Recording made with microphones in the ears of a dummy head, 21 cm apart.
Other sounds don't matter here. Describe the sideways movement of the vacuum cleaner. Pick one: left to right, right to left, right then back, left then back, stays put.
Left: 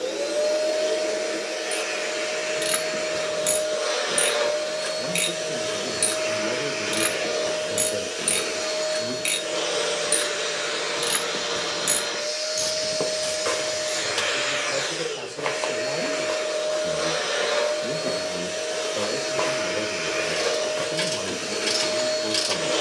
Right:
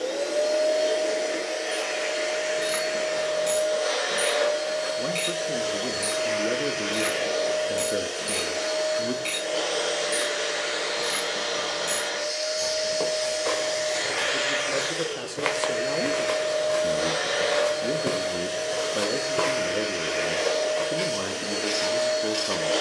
stays put.